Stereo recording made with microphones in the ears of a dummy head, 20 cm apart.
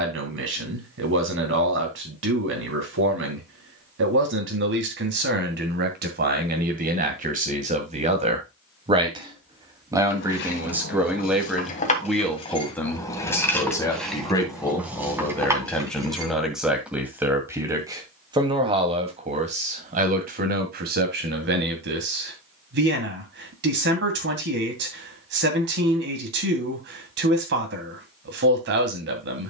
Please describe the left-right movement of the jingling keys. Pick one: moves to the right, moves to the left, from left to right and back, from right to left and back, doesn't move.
moves to the right.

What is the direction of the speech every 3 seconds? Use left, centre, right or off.
right, right, right, centre, centre, centre, right, right, right, right.